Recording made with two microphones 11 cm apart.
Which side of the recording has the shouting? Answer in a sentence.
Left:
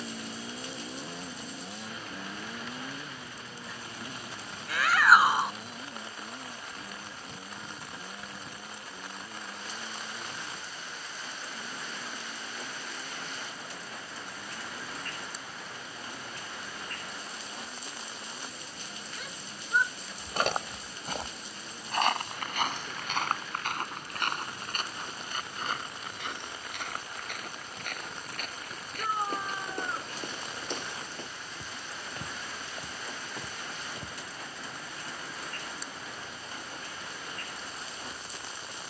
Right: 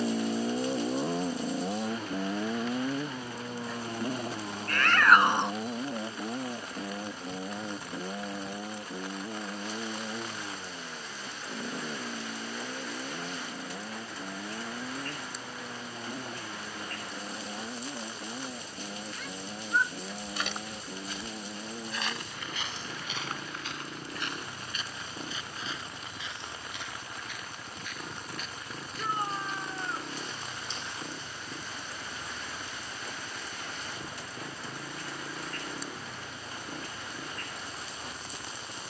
In this clip you hear the shouting in the centre.